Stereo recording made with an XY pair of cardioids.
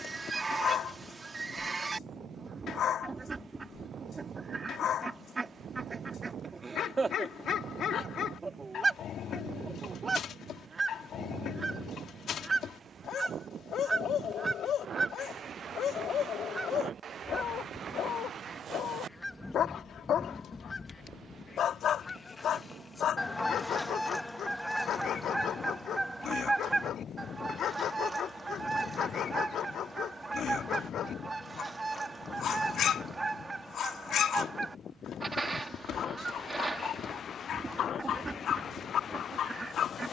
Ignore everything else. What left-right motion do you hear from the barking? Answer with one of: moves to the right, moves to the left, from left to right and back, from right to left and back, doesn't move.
doesn't move.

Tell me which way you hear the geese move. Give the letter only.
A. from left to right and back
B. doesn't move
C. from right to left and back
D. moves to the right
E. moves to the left
C.